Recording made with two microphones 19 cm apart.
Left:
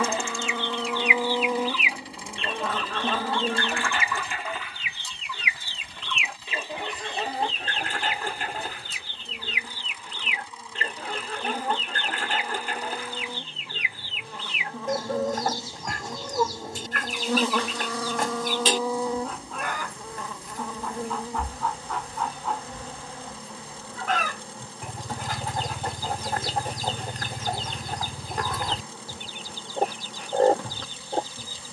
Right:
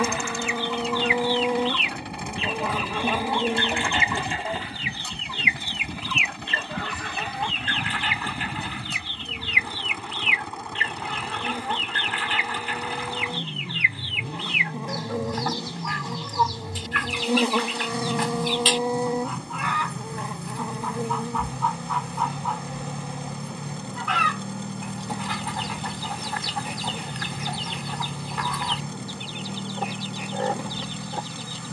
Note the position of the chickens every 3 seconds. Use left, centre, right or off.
centre, right, left, left, left, left, left, left, left, left, left.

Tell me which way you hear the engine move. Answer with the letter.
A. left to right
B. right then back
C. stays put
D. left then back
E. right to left
C.